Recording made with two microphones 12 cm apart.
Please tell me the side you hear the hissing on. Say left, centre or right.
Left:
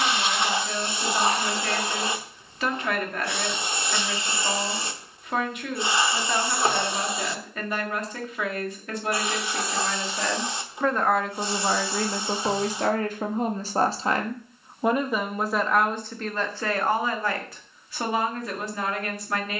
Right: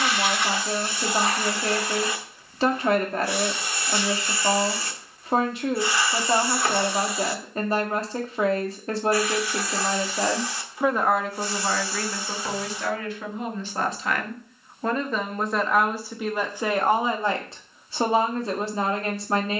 left.